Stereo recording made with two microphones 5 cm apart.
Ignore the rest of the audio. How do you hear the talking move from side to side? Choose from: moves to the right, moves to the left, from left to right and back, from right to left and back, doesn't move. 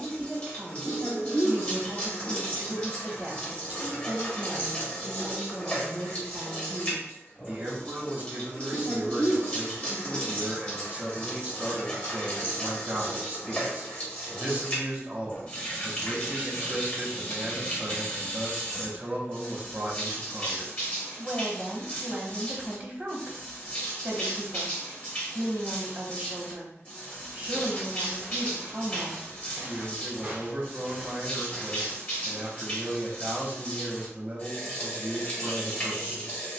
doesn't move.